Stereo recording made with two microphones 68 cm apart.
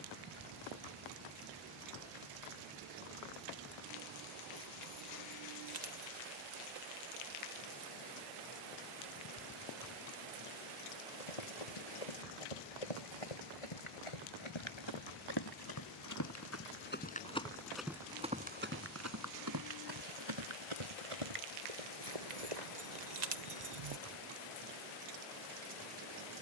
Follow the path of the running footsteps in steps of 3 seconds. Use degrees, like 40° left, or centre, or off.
off, off, off, 60° left, 50° left, 20° left, 30° right, 50° right, off.